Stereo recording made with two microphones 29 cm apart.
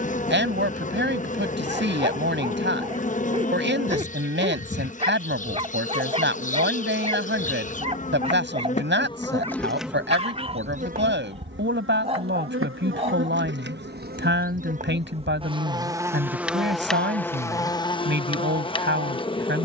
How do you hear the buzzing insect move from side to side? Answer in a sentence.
You can hear the buzzing insect move from left to right and back again.